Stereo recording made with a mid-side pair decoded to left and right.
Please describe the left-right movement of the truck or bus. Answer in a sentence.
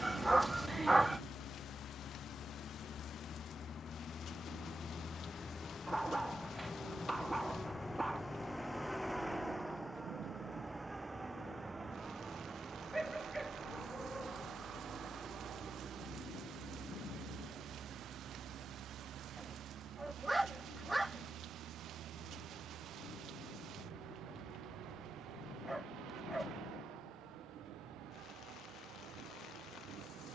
In this clip you hear the truck or bus move from left to right.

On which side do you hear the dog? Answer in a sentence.
You can hear the dog in the centre.